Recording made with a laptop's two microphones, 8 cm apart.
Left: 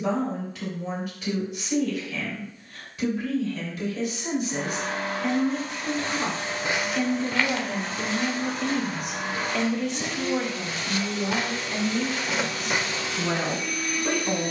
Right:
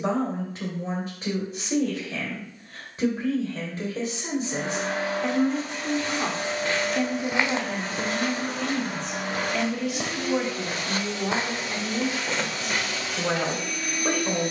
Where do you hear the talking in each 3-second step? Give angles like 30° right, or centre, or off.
30° right, 30° right, 10° right, 10° right, 30° right.